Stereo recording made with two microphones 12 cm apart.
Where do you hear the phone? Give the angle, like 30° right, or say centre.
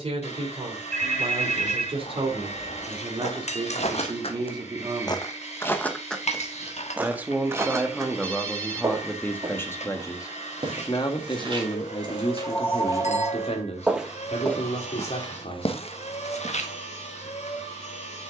10° left.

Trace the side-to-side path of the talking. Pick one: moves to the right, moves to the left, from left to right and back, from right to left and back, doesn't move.
moves to the left.